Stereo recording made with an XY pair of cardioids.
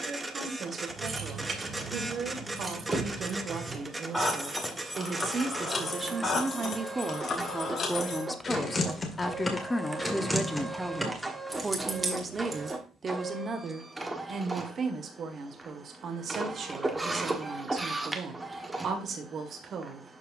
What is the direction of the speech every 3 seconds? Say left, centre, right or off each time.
right, right, centre, centre, right, right, right.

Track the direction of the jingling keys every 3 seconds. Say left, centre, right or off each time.
right, centre, left, centre, right, off, off.